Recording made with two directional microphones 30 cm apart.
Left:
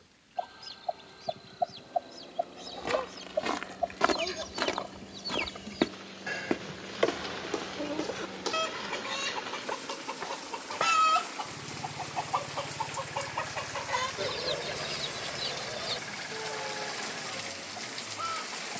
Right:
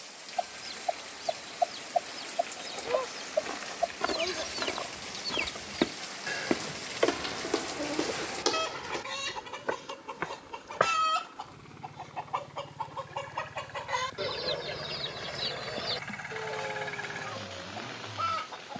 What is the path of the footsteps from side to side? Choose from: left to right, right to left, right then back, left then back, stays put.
left to right.